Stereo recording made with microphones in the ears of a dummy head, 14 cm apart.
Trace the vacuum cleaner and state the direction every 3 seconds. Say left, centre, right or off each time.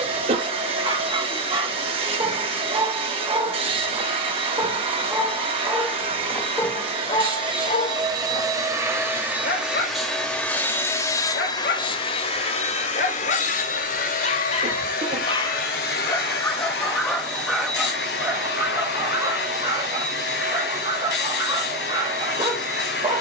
right, right, right, centre, left, left, left, left.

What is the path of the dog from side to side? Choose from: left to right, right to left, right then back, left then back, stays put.
left then back.